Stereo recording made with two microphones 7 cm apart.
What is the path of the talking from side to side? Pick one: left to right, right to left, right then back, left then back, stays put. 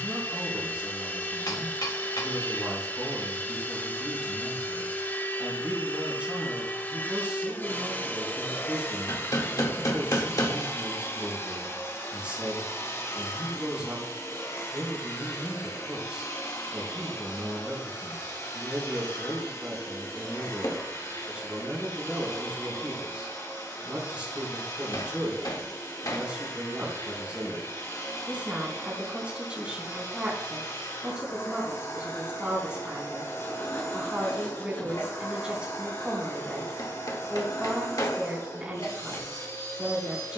stays put.